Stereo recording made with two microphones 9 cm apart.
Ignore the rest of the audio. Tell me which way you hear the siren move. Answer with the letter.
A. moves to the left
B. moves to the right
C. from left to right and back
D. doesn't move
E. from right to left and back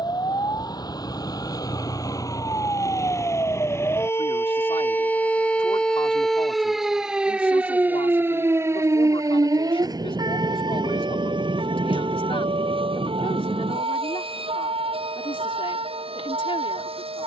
B.